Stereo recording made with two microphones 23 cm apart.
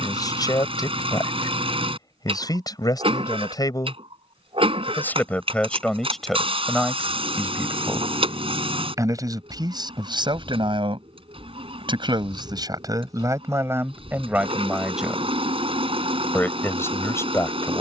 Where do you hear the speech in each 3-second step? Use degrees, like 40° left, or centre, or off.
20° left, 10° left, centre, 20° right, 10° right, 10° left.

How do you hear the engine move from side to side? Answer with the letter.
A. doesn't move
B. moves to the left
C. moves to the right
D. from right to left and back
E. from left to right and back
A.